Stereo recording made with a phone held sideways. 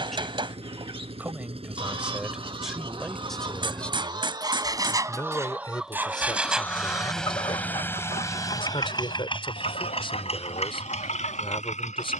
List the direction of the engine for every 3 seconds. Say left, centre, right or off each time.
right, right, centre, left.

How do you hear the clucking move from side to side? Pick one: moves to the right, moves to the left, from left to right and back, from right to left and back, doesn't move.
moves to the left.